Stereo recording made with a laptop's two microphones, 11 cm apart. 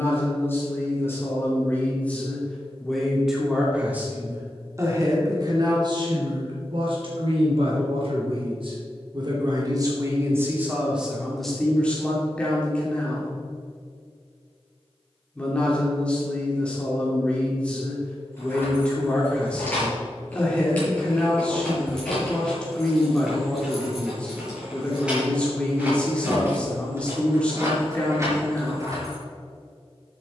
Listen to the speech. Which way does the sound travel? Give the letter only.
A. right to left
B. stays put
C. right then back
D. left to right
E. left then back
C.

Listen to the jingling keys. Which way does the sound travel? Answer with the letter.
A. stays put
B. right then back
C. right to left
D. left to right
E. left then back
D.